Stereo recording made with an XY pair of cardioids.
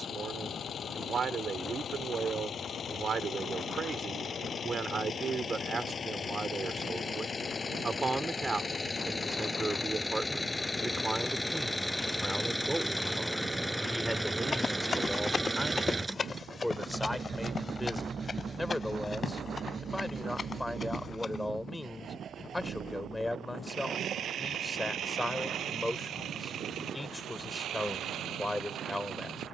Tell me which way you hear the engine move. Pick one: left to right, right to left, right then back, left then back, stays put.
left to right.